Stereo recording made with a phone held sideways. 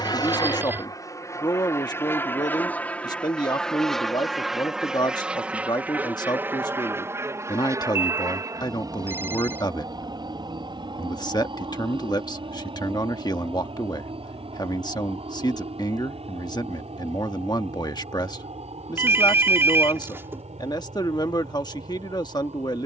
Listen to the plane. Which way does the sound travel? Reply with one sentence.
You can hear the plane move to the right.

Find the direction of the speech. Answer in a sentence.
In this clip you hear the speech on the left.